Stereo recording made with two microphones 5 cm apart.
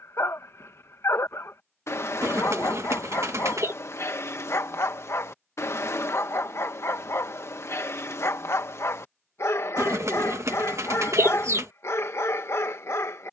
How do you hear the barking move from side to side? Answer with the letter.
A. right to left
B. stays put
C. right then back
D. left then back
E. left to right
B.